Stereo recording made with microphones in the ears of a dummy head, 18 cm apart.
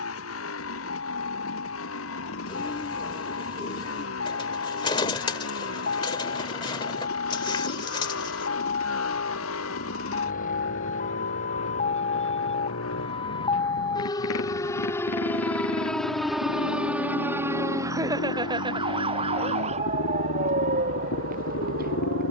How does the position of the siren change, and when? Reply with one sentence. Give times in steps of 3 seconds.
In this clip you hear the siren on the left from 0 s, in the centre from 15 s and on the right from 18 s.